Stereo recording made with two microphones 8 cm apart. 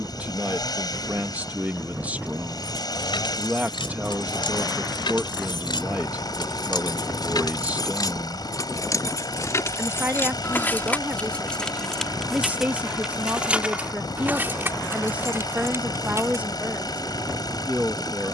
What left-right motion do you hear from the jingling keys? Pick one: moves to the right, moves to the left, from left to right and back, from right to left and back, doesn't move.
moves to the right.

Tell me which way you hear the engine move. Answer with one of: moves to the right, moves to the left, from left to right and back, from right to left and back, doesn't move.
doesn't move.